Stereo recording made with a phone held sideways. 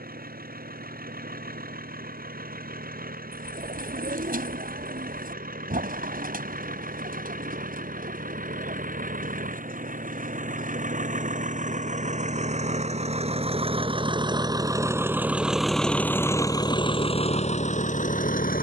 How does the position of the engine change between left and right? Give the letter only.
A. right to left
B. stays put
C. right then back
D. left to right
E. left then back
A.